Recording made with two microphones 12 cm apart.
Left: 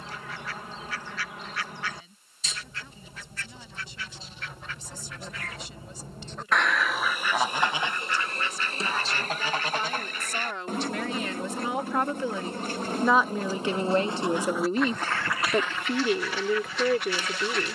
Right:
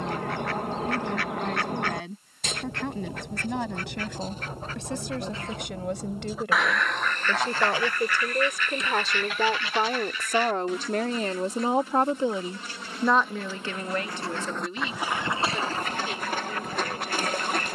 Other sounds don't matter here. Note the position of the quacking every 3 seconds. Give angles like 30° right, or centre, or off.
60° right, 40° right, 10° left, 50° left, 30° left, 40° right.